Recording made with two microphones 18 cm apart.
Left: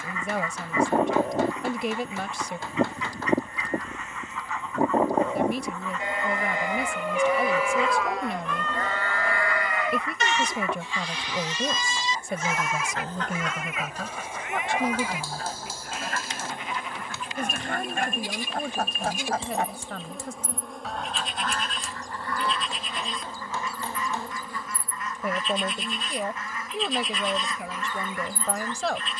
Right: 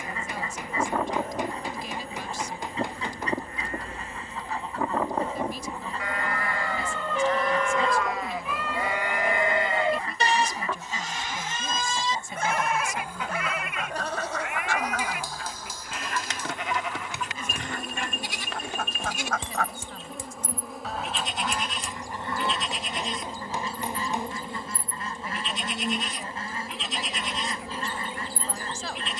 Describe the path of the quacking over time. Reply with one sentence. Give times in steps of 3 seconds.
In this clip you hear the quacking on the right from 0 s, in the centre from 12 s, on the left from 15 s and on the right from 21 s.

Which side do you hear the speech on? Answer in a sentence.
You can hear the speech on the left.